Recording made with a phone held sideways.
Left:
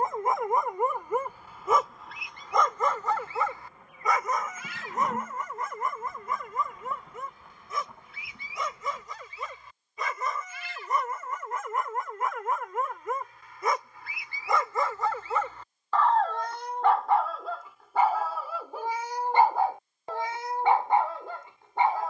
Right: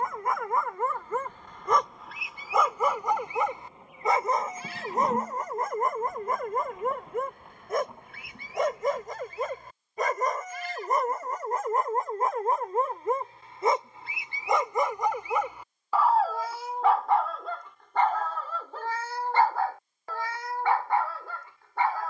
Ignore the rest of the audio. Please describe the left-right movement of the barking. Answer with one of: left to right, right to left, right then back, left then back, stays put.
right then back.